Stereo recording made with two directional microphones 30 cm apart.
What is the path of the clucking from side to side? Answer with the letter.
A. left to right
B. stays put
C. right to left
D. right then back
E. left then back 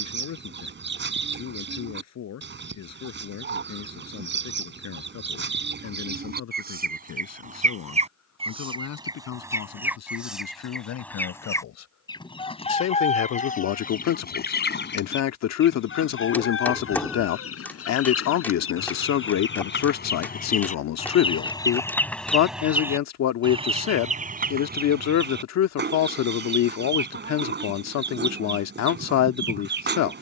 E.